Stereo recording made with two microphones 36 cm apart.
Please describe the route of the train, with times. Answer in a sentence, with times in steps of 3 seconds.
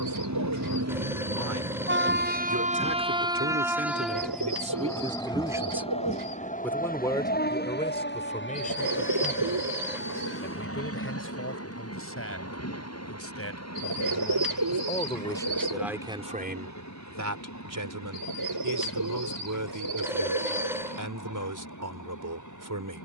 You can hear the train on the right from 0 s, in the centre from 3 s and on the left from 6 s.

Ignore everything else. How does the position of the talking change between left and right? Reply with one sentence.
You can hear the talking go left and come back.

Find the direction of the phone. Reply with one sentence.
In this clip you hear the phone in the centre.